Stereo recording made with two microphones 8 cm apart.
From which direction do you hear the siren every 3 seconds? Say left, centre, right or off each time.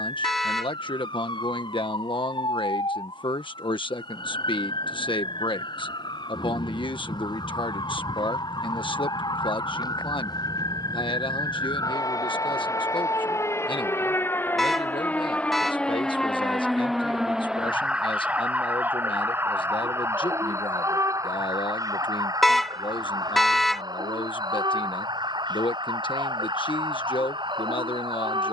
left, left, left, left, left, centre, right, right, right, right.